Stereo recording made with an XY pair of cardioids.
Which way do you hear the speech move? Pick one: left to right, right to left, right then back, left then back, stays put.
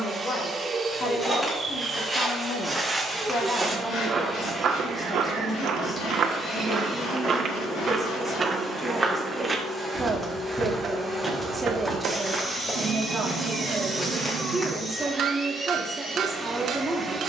left to right.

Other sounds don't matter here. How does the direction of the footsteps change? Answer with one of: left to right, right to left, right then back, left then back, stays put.
right then back.